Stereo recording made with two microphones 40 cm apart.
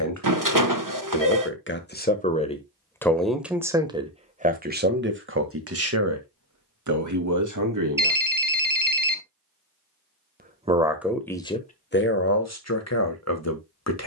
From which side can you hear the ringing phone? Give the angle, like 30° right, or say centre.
50° right.